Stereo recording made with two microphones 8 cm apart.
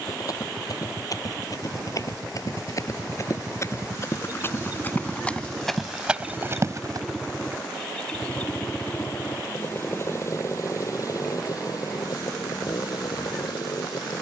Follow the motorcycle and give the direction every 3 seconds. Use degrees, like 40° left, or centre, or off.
40° right, 20° right, 10° left, 40° left, 60° left.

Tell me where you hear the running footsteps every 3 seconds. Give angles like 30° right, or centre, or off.
50° left, 30° left, 30° right, off, off.